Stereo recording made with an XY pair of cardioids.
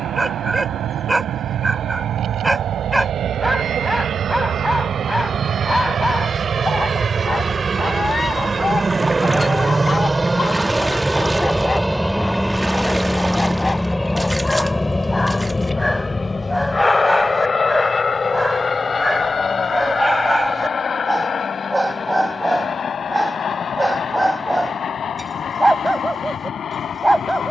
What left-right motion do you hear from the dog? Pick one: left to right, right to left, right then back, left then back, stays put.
left then back.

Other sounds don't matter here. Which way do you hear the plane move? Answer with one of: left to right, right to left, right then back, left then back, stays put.
right to left.